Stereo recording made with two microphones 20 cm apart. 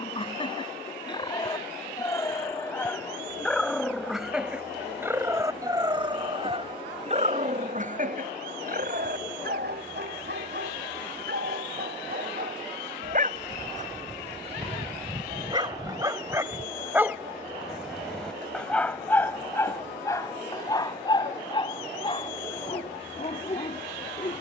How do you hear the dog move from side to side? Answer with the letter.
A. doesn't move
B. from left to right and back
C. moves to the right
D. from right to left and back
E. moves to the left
B.